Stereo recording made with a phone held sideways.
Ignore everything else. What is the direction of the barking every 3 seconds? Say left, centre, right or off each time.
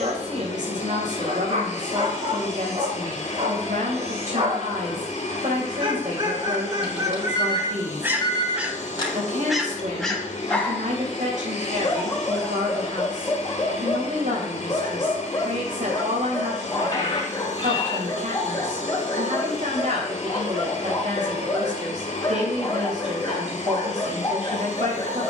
right, right, right, centre, left, left, left, left, left.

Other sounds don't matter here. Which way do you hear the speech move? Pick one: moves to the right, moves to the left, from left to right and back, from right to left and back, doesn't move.
doesn't move.